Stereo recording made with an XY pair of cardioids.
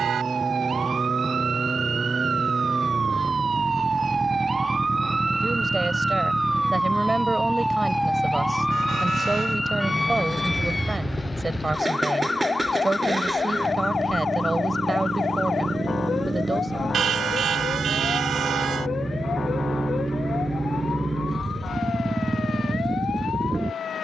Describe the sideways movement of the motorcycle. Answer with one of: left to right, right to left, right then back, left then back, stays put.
stays put.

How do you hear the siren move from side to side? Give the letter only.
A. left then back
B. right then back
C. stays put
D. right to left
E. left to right
D.